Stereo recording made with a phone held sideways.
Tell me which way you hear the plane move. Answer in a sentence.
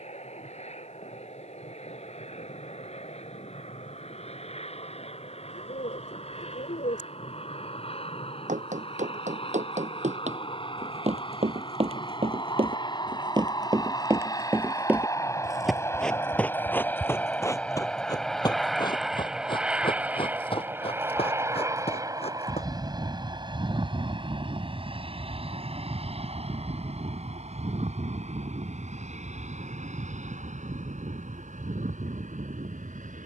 You can hear the plane travel towards the right.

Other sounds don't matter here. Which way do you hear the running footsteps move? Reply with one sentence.
In this clip you hear the running footsteps go from the right side to the left.